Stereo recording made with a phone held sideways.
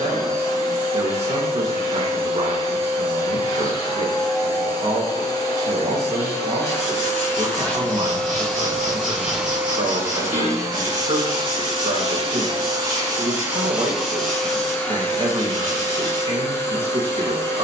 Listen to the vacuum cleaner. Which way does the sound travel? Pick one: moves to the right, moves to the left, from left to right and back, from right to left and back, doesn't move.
from left to right and back.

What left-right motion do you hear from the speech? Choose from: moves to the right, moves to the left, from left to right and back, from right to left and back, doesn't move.
doesn't move.